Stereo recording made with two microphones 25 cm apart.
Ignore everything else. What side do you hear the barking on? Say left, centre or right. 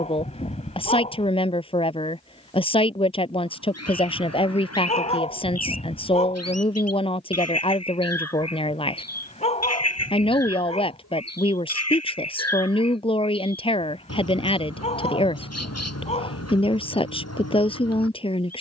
left.